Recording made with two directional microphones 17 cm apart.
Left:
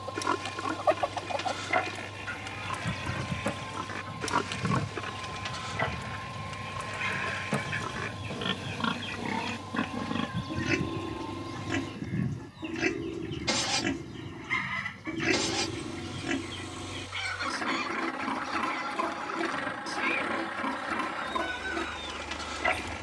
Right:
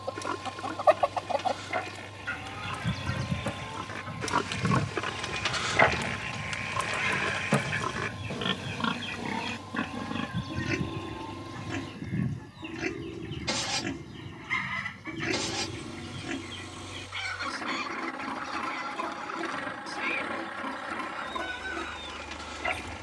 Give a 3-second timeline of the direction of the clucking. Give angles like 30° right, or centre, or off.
20° right, 10° right, 10° right, centre, centre, centre, 10° left, 10° left.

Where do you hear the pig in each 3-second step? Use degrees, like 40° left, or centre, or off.
30° left, 10° right, 30° right, 20° left, 30° left, 30° left, 30° left, 30° left.